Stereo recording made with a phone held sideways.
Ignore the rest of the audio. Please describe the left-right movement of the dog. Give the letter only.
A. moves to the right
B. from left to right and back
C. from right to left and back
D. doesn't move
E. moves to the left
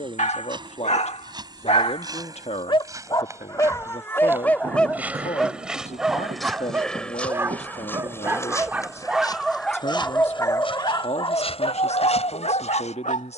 B.